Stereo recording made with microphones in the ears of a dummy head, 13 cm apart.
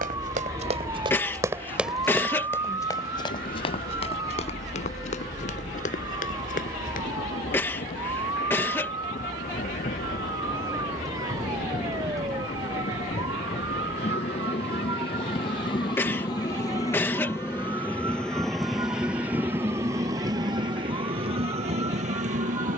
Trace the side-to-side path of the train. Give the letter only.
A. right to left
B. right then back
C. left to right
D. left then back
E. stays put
C.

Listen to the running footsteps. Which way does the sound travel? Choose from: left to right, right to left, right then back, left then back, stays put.
right to left.